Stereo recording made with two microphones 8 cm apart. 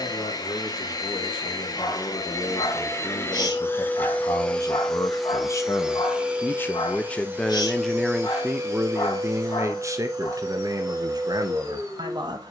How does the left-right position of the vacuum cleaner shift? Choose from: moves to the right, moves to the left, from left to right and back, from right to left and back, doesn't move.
moves to the right.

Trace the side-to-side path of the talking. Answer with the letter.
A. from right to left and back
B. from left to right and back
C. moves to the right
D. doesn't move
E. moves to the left
C.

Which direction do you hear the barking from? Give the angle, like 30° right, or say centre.
60° left.